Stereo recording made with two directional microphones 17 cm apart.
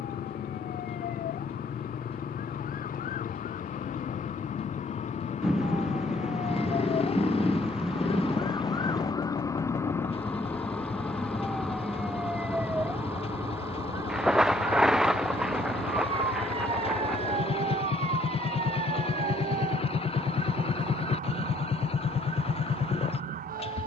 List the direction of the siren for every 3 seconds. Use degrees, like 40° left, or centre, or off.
60° left, 50° left, 30° left, 10° left, 10° right, 30° right, 40° right, 50° right.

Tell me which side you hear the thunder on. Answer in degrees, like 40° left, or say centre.
centre.